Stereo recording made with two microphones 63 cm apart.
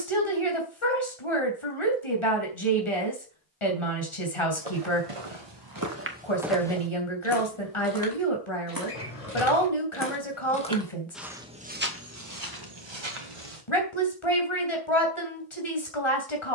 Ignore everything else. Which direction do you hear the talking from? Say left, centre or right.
left.